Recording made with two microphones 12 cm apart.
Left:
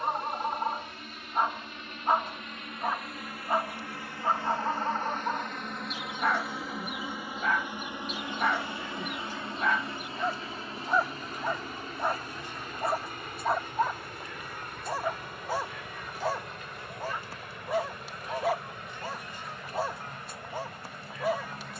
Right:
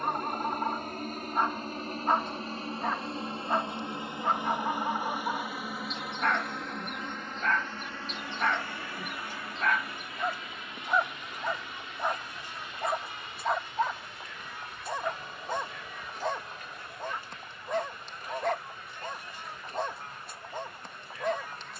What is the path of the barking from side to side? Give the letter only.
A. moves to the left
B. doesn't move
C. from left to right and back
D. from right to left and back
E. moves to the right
B.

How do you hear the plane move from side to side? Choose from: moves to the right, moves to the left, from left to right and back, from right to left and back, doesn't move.
moves to the left.